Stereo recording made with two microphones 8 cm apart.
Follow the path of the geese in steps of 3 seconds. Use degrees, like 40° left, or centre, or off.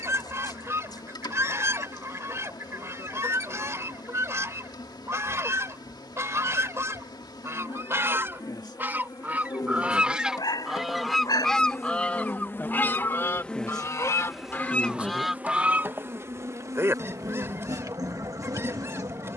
30° right, 30° right, 30° right, centre, 30° left, 20° right, 30° right.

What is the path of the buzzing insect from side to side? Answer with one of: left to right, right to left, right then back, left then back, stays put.
left to right.